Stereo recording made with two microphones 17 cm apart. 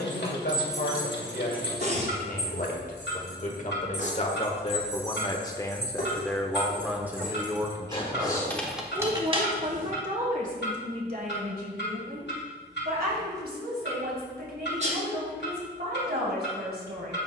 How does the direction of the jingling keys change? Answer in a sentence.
In this clip you hear the jingling keys move from right to left and back again.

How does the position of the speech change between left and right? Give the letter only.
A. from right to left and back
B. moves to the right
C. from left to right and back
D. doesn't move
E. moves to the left
B.